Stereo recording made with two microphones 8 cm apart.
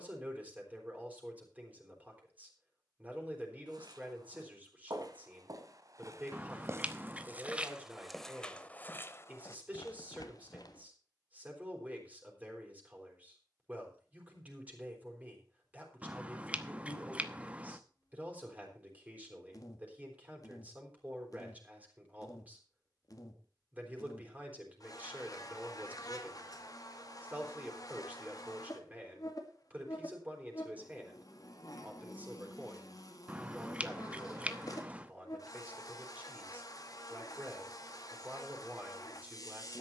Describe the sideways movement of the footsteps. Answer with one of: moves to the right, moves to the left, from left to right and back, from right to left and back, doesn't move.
moves to the left.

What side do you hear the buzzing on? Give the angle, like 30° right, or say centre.
50° left.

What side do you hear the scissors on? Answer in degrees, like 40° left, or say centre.
20° right.